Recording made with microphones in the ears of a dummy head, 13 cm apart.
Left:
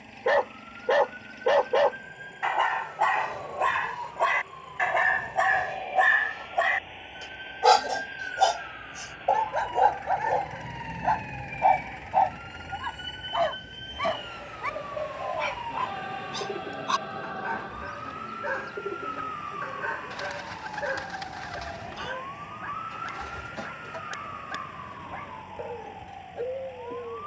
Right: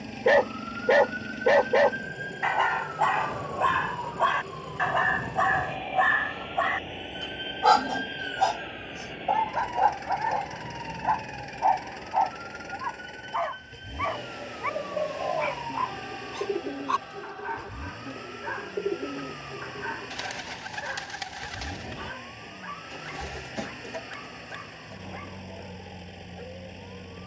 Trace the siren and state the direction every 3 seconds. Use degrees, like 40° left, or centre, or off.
70° right, 60° right, 40° right, centre, 40° left, 60° left, 70° left, 70° left, 80° left.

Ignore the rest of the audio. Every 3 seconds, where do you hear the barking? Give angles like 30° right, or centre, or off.
10° right, 10° left, 30° left, 40° left, 40° left, 50° left, 50° left, 50° left, 50° left.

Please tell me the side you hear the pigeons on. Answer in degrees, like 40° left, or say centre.
30° right.